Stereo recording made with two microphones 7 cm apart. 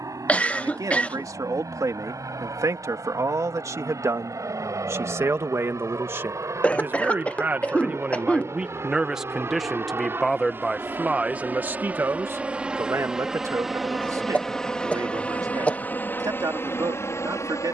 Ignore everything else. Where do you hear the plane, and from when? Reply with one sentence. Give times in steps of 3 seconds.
In this clip you hear the plane on the right from 0 s, in the centre from 12 s and on the left from 15 s.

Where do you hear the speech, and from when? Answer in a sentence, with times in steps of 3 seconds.
You can hear the speech on the right from 0 s, in the centre from 9 s and on the right from 12 s.